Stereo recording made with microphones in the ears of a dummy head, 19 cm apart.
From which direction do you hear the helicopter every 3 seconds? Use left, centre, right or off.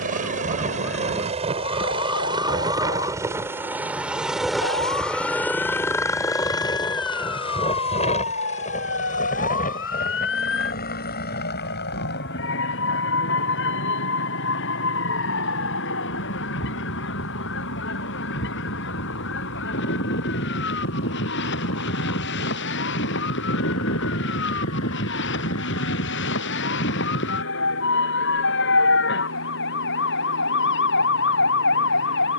right, centre, left, left, left, left, left, left, left, left, left.